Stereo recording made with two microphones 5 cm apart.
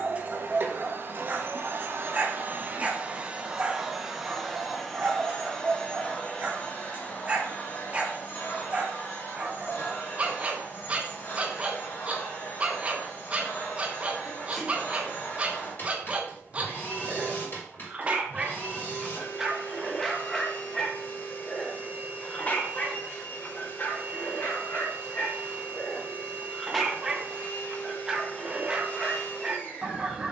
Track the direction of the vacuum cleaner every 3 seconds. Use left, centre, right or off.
right, centre, left, left, left, left, left, left, left, left.